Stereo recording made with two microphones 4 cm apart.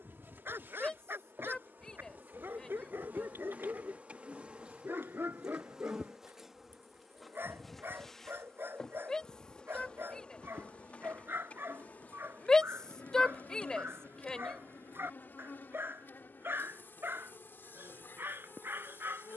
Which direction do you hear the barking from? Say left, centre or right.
right.